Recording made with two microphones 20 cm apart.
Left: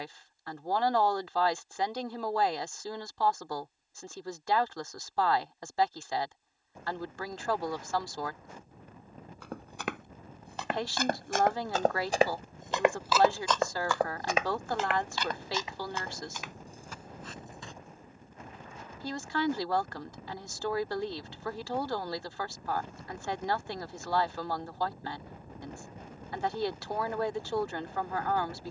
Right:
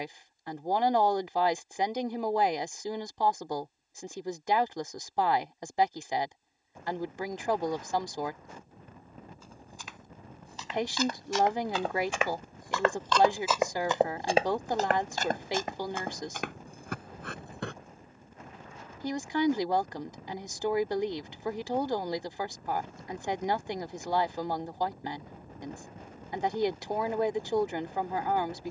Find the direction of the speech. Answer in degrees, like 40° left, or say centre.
20° right.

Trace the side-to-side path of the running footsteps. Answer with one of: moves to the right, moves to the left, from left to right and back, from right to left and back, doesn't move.
moves to the right.